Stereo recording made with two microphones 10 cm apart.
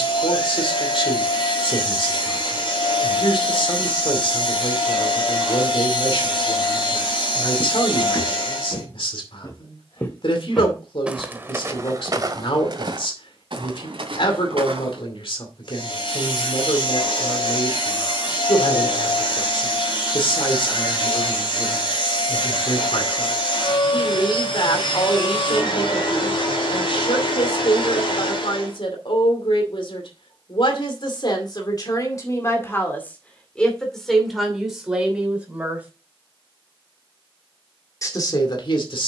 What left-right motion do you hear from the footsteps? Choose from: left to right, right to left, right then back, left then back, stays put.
left to right.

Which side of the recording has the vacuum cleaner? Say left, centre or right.
left.